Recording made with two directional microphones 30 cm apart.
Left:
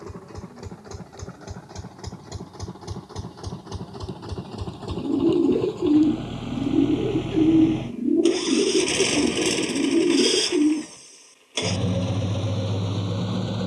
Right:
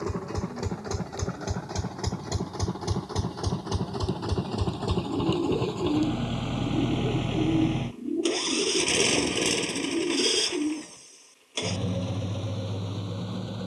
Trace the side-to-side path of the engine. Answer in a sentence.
You can hear the engine move from right to left.